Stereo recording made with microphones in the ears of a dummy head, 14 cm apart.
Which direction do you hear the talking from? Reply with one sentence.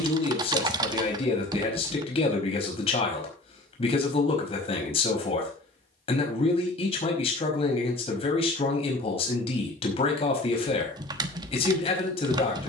In this clip you hear the talking on the left.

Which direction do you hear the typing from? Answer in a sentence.
You can hear the typing on the right.